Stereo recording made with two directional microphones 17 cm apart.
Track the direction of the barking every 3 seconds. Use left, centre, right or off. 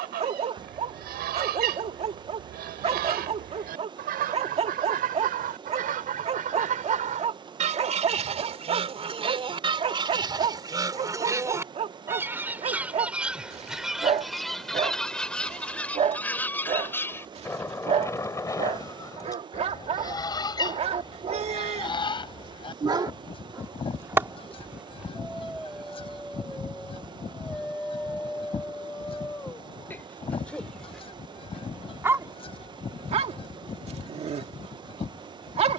right, right, right, right, right, right, right, right, centre, centre, centre, right.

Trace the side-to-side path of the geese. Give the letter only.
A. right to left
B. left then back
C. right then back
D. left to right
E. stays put
A.